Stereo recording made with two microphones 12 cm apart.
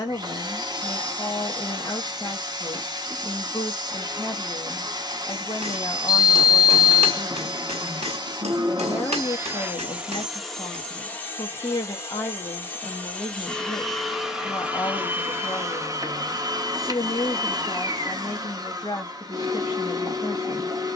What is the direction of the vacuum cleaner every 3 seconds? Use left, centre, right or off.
right, right, right, centre, centre, right, right.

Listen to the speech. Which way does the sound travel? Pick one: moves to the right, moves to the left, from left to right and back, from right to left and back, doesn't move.
doesn't move.